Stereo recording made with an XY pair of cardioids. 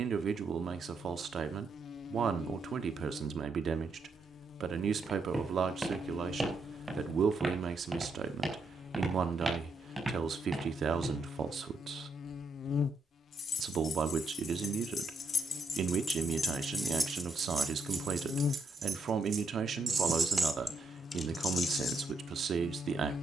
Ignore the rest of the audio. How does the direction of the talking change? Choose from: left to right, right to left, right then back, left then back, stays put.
stays put.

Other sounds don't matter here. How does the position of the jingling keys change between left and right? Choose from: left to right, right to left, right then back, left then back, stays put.
right then back.